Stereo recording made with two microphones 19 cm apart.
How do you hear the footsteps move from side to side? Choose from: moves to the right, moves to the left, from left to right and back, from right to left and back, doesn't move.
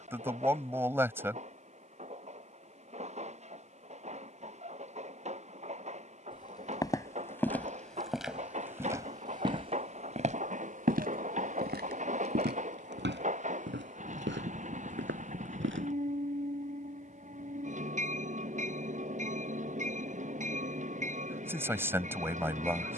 moves to the right.